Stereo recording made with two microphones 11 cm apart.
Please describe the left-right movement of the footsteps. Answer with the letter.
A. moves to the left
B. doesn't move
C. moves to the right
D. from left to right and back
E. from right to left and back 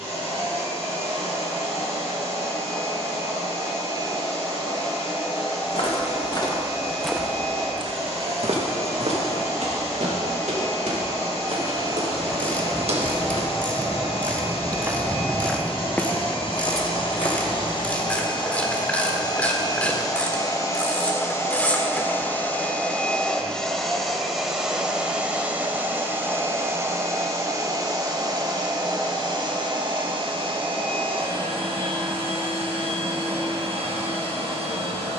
D.